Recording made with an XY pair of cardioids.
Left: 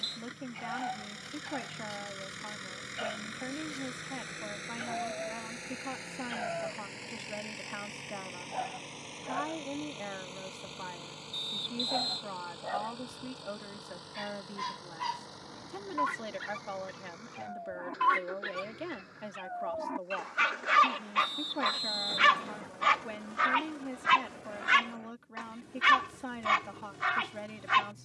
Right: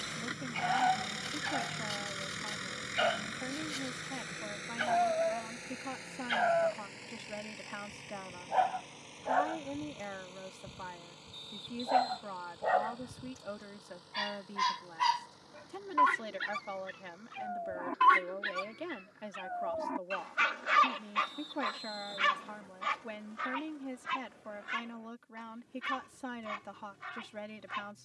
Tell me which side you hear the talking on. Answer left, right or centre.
centre.